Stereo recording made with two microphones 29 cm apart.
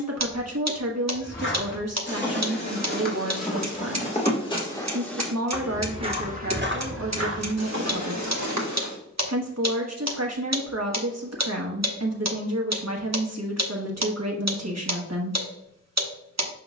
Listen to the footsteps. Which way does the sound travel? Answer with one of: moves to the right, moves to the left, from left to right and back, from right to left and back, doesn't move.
moves to the right.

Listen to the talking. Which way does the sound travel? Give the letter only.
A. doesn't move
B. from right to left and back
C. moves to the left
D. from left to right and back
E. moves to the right
A.